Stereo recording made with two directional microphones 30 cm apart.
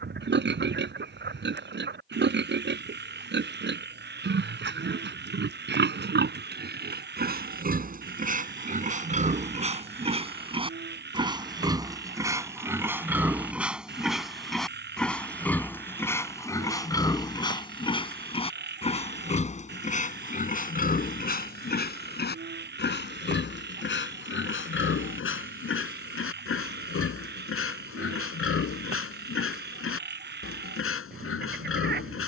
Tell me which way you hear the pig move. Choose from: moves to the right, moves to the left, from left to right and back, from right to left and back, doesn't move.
moves to the left.